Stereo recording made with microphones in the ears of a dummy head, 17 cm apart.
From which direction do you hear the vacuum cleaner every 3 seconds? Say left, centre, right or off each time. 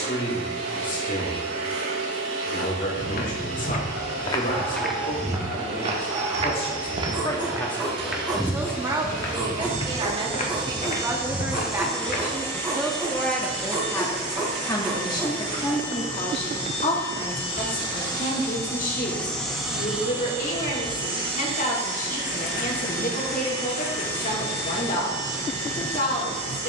right, right, right, right, left, left, centre, right, right.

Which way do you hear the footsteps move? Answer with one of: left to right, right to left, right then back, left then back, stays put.
right then back.